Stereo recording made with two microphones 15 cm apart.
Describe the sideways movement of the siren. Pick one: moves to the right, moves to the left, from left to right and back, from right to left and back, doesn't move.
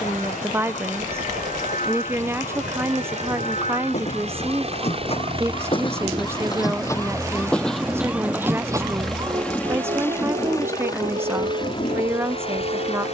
moves to the right.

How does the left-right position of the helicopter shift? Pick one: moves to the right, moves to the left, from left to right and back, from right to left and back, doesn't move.
moves to the left.